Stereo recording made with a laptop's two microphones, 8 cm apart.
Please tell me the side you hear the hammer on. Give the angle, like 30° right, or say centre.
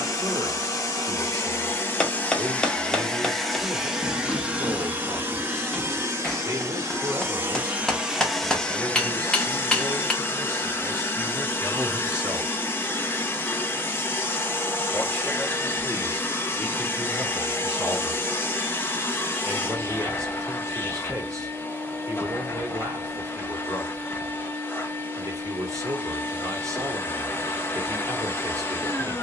10° left.